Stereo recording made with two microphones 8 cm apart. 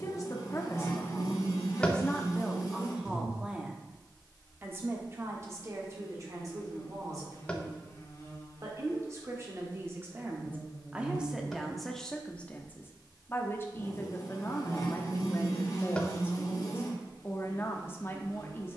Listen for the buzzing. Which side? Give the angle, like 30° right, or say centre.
50° left.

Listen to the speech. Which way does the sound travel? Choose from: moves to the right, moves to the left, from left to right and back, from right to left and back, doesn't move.
from left to right and back.